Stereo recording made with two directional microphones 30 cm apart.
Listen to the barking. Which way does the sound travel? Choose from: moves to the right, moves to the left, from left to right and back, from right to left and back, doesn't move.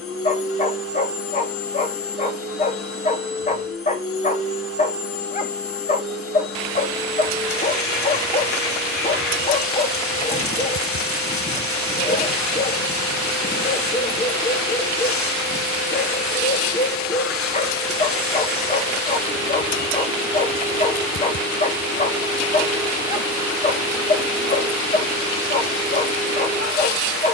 doesn't move.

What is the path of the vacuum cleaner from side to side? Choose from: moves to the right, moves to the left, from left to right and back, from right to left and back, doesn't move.
doesn't move.